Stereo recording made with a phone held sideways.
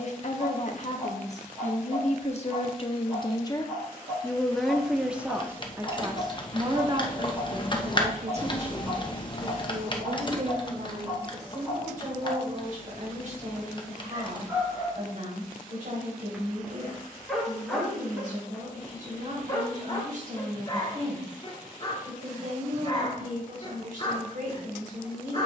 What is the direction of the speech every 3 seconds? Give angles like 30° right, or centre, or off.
50° left, centre, 40° right, 50° right, 60° right, 60° right, 60° right, 60° right, 60° right.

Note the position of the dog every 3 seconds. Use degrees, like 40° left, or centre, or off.
30° right, 30° right, 30° right, 30° right, 20° right, centre, 20° left, 30° left, 30° left.